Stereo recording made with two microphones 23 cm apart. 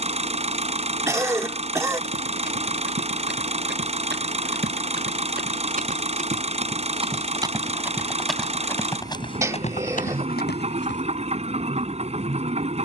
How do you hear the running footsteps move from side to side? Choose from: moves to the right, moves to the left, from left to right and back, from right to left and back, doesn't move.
moves to the left.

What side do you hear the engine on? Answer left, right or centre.
right.